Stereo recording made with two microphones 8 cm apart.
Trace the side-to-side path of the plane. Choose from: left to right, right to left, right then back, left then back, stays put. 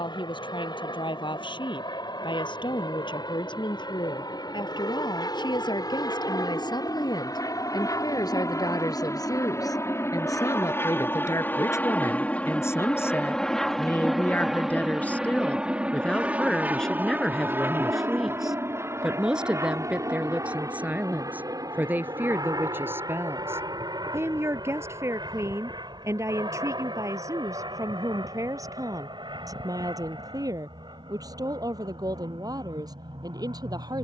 left to right.